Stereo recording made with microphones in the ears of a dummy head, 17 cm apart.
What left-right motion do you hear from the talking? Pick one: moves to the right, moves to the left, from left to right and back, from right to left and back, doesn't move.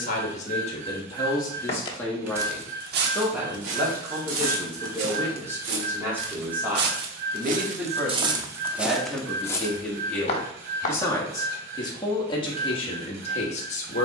from left to right and back.